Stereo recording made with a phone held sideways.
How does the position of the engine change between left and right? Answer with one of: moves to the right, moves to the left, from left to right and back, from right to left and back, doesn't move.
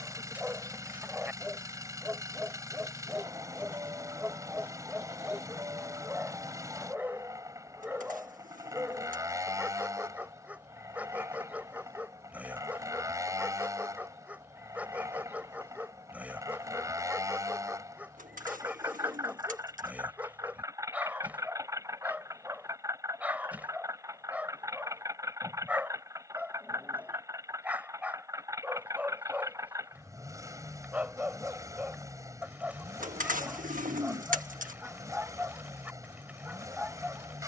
doesn't move.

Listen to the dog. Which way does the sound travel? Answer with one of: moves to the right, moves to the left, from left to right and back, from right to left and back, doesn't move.
doesn't move.